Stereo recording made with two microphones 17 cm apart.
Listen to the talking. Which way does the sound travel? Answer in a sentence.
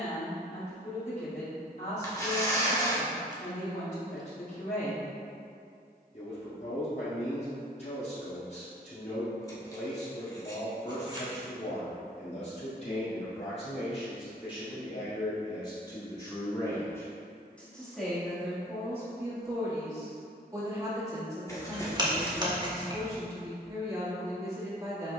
You can hear the talking travel towards the right.